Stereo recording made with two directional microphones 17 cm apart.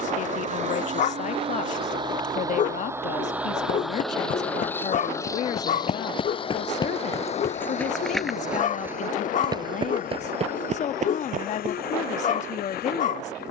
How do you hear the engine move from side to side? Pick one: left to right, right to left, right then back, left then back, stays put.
right to left.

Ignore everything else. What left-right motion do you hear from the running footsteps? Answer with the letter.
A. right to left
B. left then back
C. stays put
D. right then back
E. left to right
E.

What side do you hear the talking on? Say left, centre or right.
left.